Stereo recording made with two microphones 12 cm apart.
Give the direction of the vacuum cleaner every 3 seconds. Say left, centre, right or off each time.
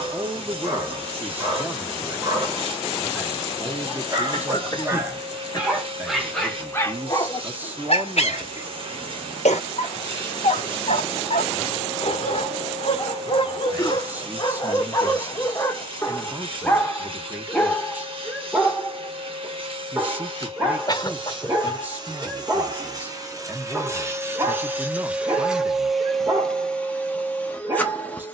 right, right, right, right, right, right, right, right, centre, centre.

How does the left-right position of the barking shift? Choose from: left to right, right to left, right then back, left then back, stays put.
left then back.